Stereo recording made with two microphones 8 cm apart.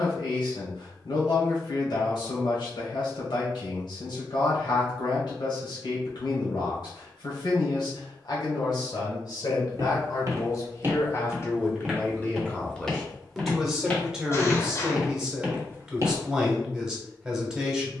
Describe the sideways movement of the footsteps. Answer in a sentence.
In this clip you hear the footsteps go left and come back.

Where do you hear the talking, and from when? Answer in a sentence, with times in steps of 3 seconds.
You can hear the talking on the left from 0 s and in the centre from 12 s.